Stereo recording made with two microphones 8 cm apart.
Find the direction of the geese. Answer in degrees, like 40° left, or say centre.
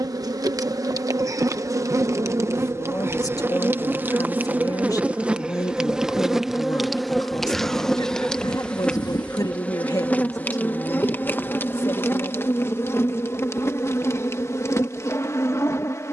70° left.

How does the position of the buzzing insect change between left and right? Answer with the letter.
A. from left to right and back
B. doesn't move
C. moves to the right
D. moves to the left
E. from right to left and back
D.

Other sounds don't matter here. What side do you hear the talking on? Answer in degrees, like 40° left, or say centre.
50° left.